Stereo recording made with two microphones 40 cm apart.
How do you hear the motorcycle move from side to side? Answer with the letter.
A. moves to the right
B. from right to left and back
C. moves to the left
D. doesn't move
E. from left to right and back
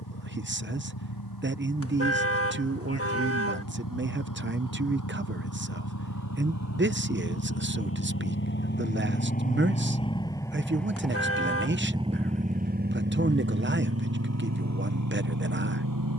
A.